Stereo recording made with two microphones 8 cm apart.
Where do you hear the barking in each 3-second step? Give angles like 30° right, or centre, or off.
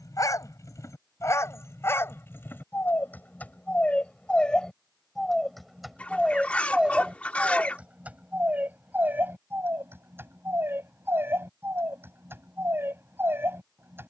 30° left, 10° left, 10° right, 30° right, 30° right.